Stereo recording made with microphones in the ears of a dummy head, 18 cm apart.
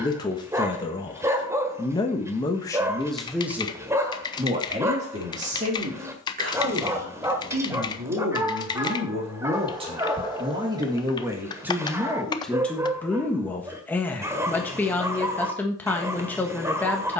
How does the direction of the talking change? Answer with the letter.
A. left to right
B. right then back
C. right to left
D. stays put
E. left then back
B.